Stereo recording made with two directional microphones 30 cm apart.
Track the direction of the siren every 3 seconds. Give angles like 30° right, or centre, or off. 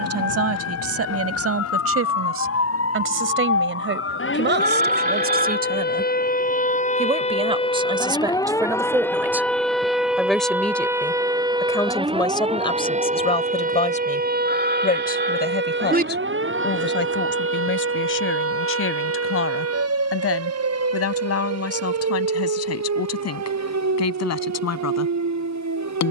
50° left, 40° left, 20° left, 10° right, 20° right, 40° right, 50° right, 50° right, 60° right.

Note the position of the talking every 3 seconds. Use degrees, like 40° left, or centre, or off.
50° right, 30° right, 20° right, centre, 20° left, 30° left, 40° left, 50° left, 50° left.